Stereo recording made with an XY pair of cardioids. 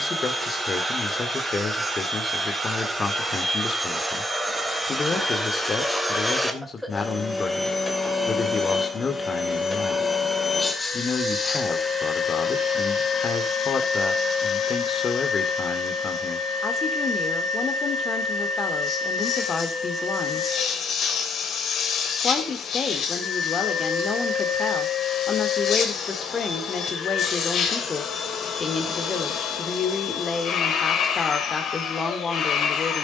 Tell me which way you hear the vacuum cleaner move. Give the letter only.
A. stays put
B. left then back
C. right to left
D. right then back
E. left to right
C.